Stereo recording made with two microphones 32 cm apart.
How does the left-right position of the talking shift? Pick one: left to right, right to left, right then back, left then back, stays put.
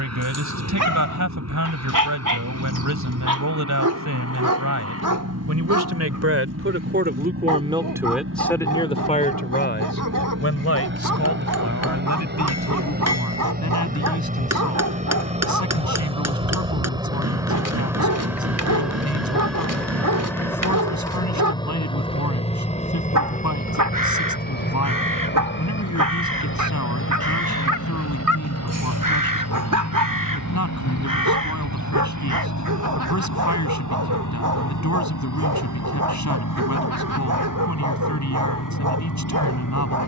right to left.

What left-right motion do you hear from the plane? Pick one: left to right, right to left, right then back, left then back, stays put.
right to left.